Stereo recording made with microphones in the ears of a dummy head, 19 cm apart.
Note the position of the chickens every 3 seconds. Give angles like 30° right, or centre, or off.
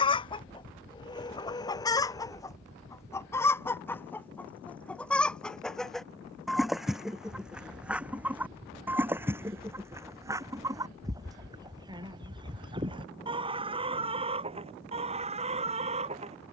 20° left, 10° left, centre, 20° right, 30° right, 30° right.